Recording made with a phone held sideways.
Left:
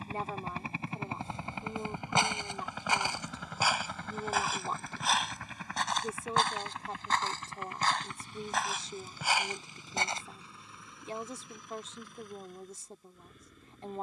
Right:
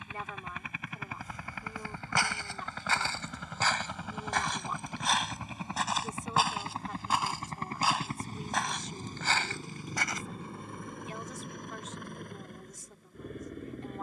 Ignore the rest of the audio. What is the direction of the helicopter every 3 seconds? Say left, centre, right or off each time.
left, centre, right, right, right.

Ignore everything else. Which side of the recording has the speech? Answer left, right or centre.
left.